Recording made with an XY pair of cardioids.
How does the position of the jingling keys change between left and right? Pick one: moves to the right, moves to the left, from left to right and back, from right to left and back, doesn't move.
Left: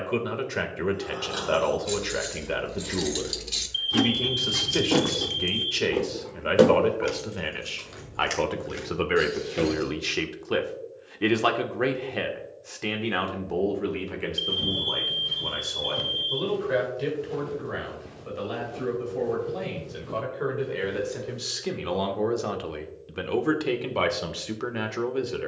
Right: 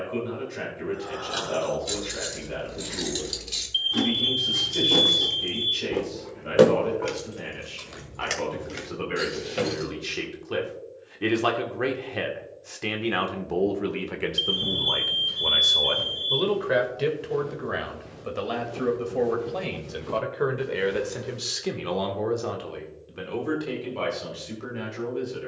from right to left and back.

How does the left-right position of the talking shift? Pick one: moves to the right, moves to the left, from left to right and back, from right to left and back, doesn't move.
from left to right and back.